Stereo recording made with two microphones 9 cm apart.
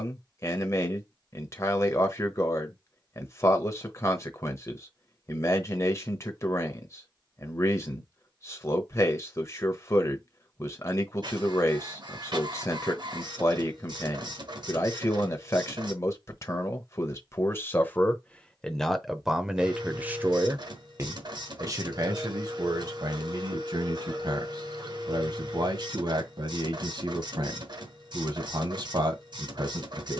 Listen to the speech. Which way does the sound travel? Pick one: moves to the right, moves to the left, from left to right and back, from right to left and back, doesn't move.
moves to the right.